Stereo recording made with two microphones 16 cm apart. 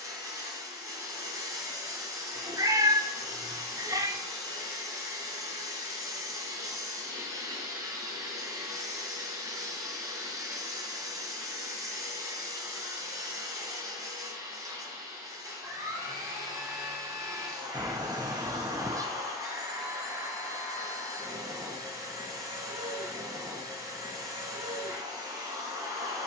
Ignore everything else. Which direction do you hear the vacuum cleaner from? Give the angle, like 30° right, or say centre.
20° right.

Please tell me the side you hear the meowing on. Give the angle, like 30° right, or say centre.
20° right.